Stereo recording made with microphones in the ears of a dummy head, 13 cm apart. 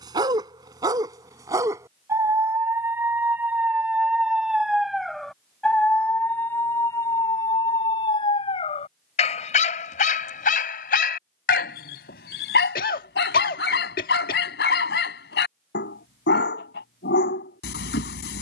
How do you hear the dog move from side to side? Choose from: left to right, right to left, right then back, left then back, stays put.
right to left.